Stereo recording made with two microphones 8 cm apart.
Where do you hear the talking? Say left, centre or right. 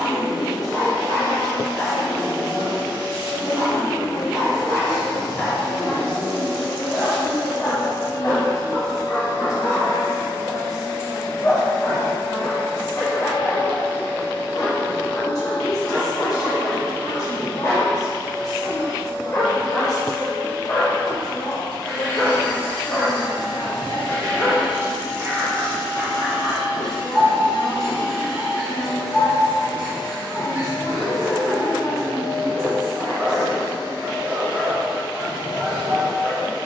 left.